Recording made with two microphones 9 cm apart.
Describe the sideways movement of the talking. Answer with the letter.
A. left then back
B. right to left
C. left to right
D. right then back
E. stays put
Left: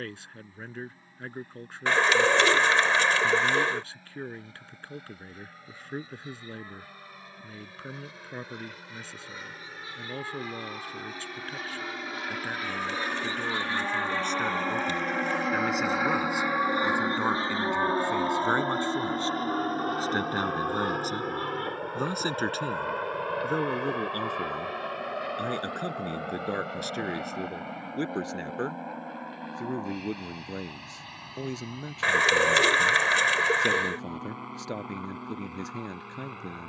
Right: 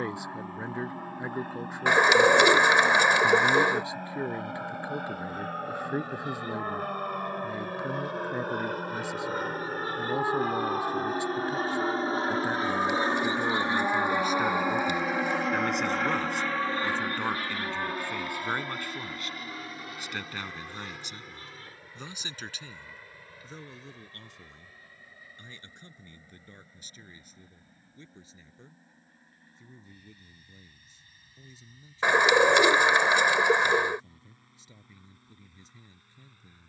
B.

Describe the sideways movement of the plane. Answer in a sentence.
You can hear the plane travel towards the left.